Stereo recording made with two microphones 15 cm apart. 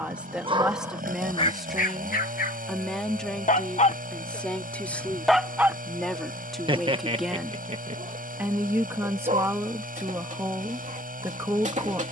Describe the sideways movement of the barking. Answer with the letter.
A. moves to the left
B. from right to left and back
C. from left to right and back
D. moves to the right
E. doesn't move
B.